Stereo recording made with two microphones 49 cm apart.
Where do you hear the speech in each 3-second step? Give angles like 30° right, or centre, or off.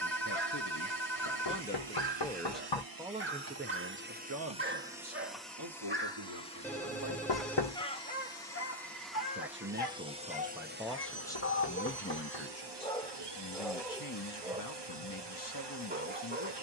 20° left, 30° right, 50° right, centre, 40° left, 40° left.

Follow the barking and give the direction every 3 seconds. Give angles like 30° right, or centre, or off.
20° right, 20° right, 10° left, 40° left, centre, 20° right.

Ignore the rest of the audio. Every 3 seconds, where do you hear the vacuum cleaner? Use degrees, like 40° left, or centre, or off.
60° right, 10° right, 10° left, 20° right, 50° right, 60° right.